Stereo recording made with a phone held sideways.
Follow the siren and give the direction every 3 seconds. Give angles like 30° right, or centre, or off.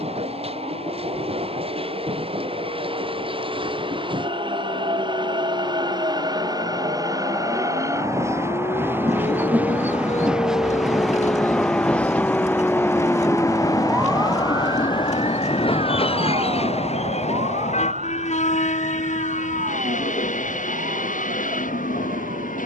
80° left, 70° left, 60° left, 40° left, 10° right, 40° right, 60° right, 70° right.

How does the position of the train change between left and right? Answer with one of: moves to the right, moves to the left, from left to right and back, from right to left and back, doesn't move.
moves to the left.